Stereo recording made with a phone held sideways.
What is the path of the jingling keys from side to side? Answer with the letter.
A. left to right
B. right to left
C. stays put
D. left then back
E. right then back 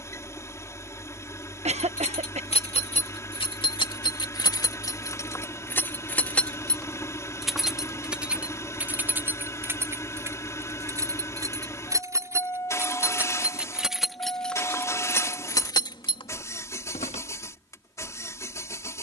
E.